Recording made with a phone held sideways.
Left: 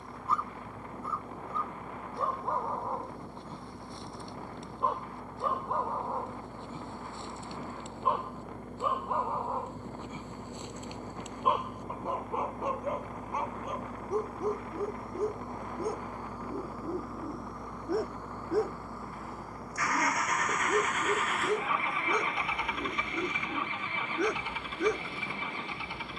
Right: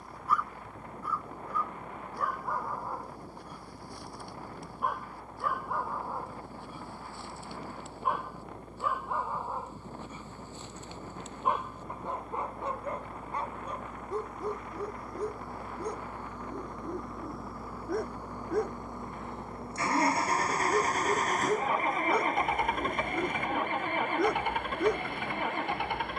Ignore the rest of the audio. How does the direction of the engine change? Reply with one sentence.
In this clip you hear the engine move to the right.